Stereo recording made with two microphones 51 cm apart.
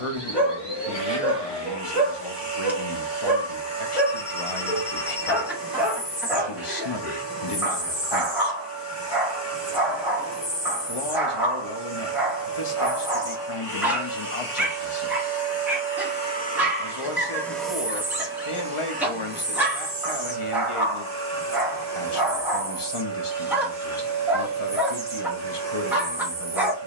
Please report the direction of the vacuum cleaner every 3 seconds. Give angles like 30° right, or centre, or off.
50° left, 50° left, 50° left, 50° left, 50° left, 20° left, 20° right, 30° right, 30° right.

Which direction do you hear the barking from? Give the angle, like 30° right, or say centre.
centre.